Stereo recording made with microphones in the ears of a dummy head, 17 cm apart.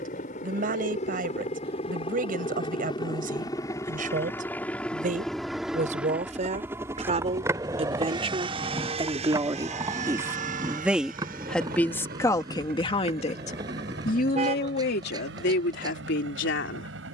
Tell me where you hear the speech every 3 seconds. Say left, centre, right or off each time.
right, right, right, centre, left, left.